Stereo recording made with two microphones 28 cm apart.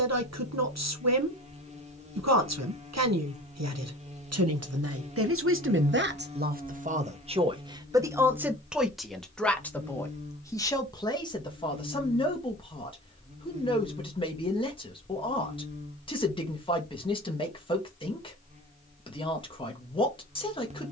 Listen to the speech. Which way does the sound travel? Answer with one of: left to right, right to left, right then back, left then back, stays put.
right to left.